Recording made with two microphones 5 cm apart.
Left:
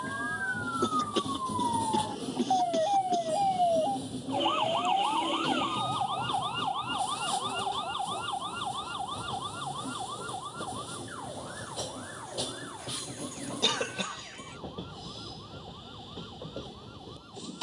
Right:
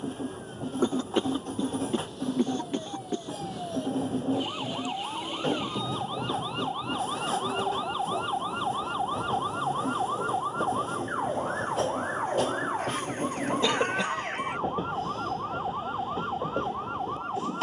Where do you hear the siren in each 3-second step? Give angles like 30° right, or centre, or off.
60° left, 30° left, 10° right, 30° right, 50° right, 60° right.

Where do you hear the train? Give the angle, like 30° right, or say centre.
40° right.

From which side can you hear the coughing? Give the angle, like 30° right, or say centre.
20° right.